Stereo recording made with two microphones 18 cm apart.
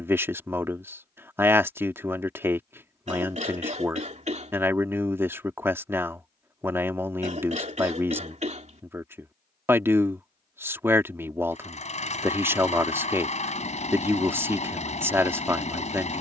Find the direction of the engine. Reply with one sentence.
You can hear the engine on the left.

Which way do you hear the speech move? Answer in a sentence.
You can hear the speech stay put.